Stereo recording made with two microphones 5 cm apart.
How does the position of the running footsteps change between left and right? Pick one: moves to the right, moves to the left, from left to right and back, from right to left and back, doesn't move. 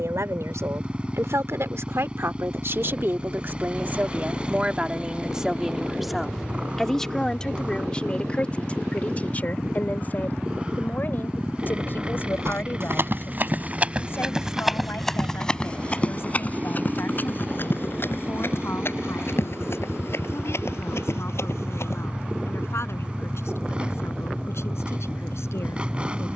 moves to the left.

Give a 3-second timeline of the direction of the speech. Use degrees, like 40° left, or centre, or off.
60° right, 30° right, 20° left, 40° left, 50° left, 50° left, 60° left, 60° left, 60° left.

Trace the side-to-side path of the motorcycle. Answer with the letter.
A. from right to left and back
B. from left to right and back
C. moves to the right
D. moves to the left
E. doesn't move
E.